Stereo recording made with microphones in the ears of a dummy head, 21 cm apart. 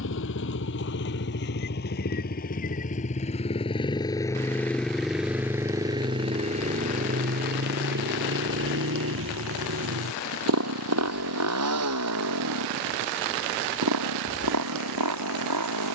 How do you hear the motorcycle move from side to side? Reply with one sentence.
You can hear the motorcycle go from the left side to the right.